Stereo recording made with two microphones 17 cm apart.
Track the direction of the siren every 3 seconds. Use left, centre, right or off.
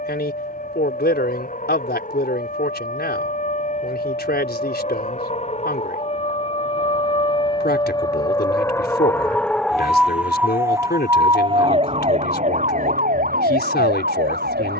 left, left, left, centre, right.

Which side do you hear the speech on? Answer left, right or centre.
left.